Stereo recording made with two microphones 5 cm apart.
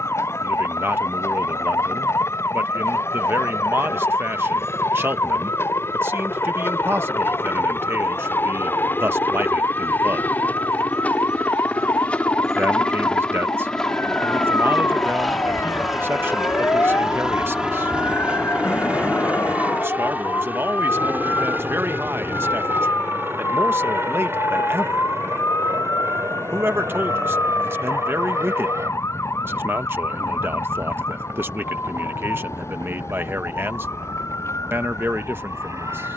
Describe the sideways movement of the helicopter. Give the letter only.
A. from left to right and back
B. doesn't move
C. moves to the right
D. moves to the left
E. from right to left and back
C.